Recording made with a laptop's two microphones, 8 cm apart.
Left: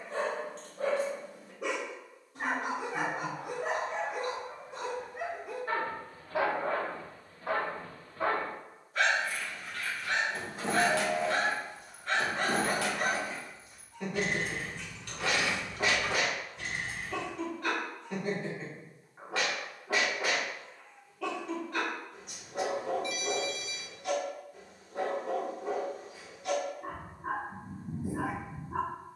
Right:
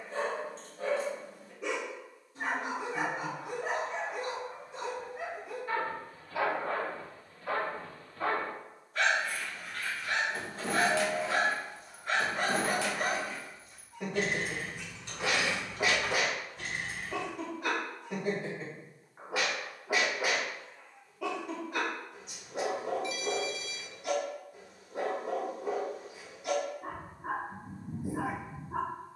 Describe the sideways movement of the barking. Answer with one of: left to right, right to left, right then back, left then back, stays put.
left to right.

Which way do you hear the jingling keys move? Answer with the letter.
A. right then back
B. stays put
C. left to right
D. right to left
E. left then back
E.